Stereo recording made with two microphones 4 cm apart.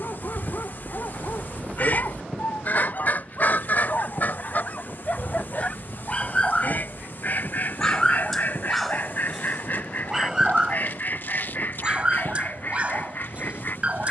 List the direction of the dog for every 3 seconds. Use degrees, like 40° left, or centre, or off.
50° left, 40° left, 10° left, 20° right, 30° right.